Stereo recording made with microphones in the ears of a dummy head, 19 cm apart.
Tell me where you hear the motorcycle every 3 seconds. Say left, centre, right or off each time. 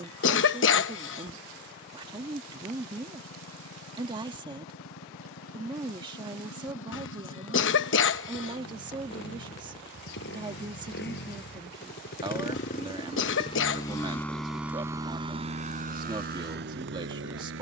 left, left, left, left, left, right.